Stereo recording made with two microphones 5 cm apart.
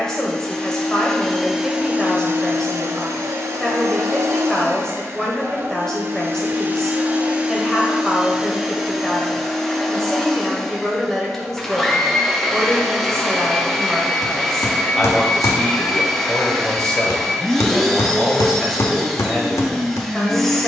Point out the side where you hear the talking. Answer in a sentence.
You can hear the talking in the centre.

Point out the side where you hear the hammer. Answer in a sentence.
You can hear the hammer on the left.